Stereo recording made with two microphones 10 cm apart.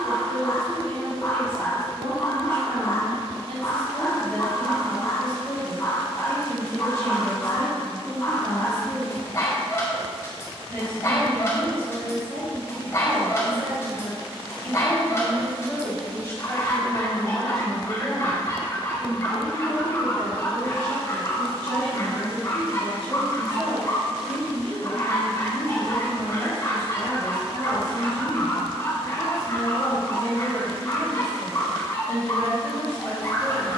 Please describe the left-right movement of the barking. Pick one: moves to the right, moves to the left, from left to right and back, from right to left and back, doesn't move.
doesn't move.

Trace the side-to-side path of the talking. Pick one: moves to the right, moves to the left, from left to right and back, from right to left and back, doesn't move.
from right to left and back.